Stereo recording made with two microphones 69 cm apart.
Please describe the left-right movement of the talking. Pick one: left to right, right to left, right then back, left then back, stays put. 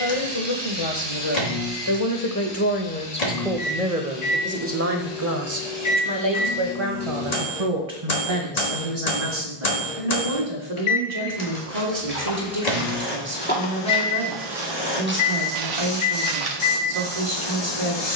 left to right.